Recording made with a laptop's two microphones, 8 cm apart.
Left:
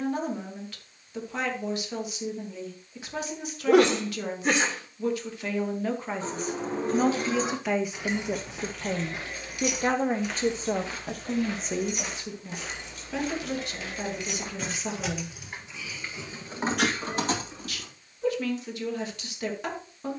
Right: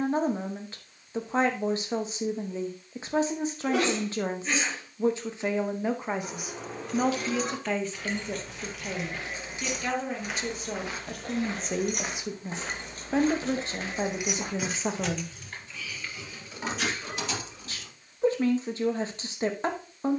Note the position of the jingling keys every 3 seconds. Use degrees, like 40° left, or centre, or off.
off, off, 20° left, 40° right, 30° right, 30° left, off.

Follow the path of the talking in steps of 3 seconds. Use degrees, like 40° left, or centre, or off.
30° right, 30° right, 10° left, 20° left, 30° right, 30° right, 30° right.